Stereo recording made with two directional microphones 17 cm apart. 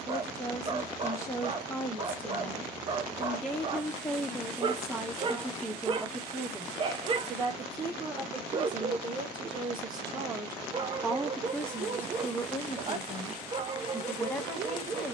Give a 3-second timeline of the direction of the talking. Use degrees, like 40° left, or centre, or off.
10° left, centre, 20° right, 10° right, 20° left.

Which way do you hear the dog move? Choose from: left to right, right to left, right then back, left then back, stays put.
stays put.